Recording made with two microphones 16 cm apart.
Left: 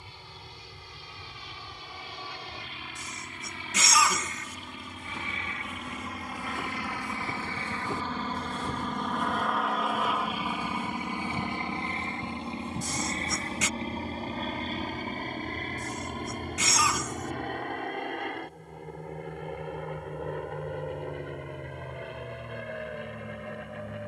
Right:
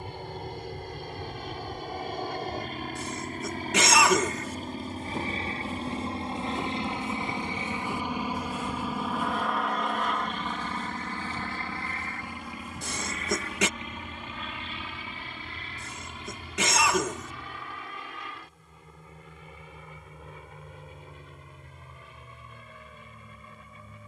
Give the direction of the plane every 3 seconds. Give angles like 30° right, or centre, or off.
50° right, 40° right, 20° right, 10° left, 30° left, 50° left, 50° left, 60° left.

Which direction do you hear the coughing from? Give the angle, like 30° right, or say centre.
60° right.